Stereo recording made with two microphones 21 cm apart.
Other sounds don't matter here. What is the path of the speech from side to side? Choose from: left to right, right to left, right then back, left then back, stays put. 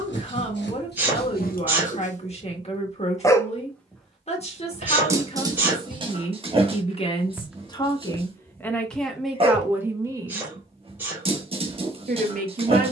left to right.